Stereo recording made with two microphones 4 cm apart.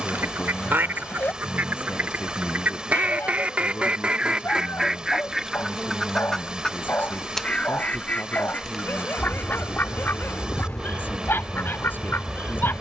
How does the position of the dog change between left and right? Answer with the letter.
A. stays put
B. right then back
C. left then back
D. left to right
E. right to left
A.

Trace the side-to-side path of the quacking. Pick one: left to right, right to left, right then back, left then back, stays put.
right to left.